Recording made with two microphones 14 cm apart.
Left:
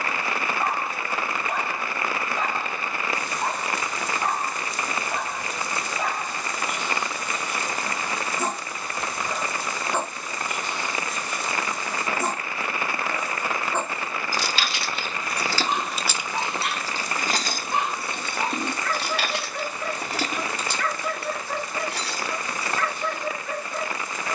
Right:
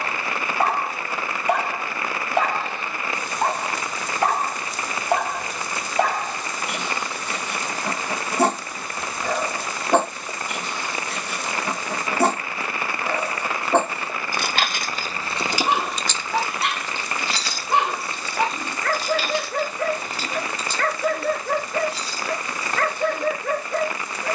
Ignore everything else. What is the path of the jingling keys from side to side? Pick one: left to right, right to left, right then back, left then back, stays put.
right to left.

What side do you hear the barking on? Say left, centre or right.
right.